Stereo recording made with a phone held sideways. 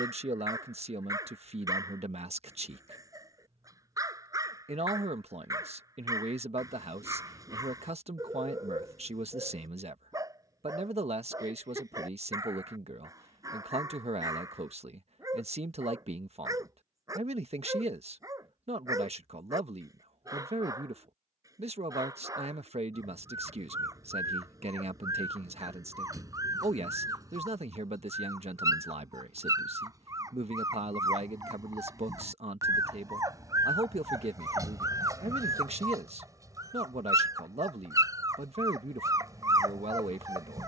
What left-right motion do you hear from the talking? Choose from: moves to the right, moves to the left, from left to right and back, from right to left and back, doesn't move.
doesn't move.